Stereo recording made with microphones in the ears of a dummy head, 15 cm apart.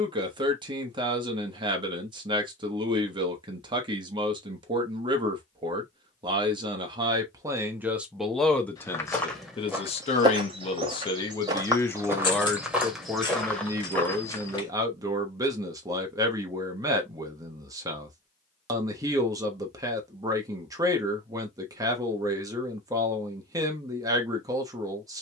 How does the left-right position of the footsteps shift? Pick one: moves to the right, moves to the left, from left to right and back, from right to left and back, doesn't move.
from left to right and back.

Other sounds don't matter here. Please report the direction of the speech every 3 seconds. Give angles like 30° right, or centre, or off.
30° right, 30° right, 10° right, 30° left, 10° right, 20° right, 20° right, 20° right, 20° right.